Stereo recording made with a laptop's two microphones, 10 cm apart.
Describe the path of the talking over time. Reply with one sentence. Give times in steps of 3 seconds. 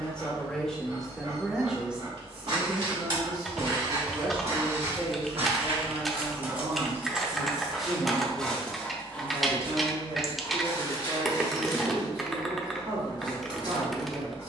In this clip you hear the talking in the centre from 0 s and on the right from 3 s.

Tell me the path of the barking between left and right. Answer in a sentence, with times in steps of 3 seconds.
You can hear the barking on the right from 0 s, in the centre from 6 s and on the left from 9 s.